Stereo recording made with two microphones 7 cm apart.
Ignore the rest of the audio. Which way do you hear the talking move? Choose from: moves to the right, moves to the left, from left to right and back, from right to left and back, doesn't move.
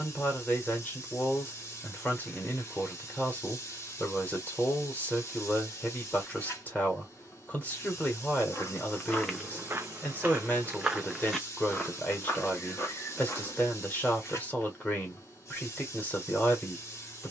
doesn't move.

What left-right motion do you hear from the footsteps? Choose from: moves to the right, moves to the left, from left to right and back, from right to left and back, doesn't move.
from left to right and back.